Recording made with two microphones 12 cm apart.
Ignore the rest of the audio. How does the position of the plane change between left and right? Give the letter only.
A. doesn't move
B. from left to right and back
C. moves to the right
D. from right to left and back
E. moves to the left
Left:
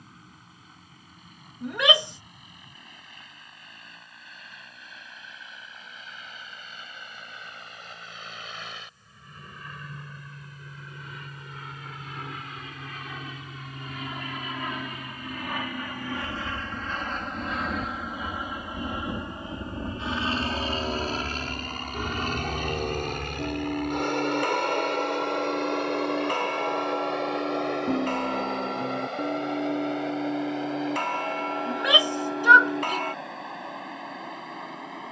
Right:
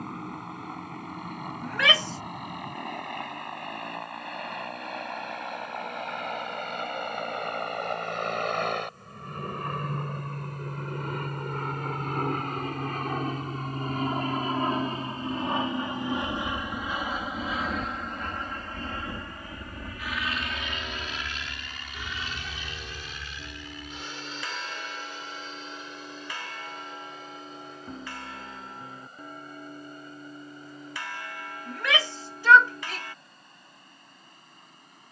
E.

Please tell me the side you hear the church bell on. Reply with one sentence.
You can hear the church bell on the left.